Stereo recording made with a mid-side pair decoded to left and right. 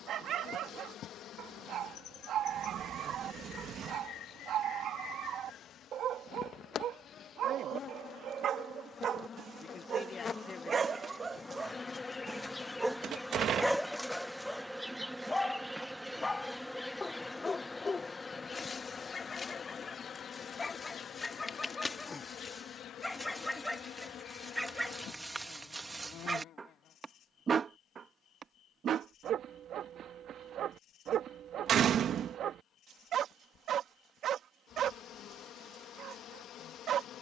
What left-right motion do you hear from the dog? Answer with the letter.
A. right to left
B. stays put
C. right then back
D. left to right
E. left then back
E.